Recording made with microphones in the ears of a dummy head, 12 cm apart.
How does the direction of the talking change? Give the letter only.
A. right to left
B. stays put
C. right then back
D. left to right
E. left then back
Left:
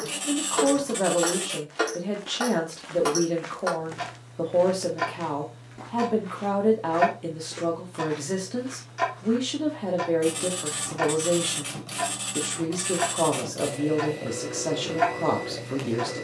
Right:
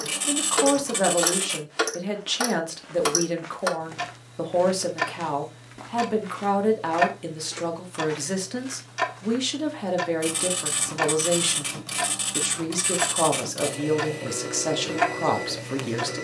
B.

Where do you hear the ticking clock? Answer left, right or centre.
right.